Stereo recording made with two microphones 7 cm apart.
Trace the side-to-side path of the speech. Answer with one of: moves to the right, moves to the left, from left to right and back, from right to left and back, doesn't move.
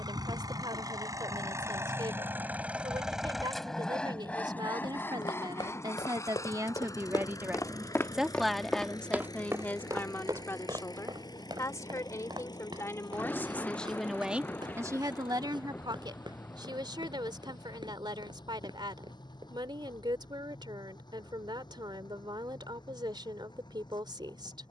from right to left and back.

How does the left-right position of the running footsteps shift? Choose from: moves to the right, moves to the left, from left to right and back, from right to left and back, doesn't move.
moves to the right.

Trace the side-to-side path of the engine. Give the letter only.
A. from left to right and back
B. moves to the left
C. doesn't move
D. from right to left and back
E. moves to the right
B.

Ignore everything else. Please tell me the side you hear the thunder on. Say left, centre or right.
left.